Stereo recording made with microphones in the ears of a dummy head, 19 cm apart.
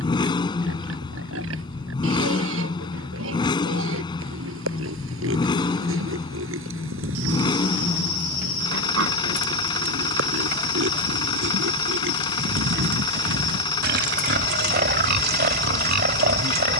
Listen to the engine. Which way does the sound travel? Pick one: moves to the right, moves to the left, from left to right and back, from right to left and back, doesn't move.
doesn't move.